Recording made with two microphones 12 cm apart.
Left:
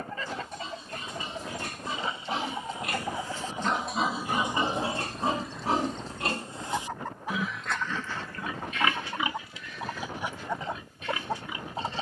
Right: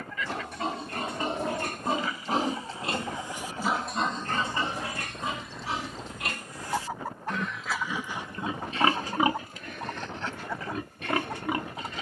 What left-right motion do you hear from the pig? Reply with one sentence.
You can hear the pig go left and come back.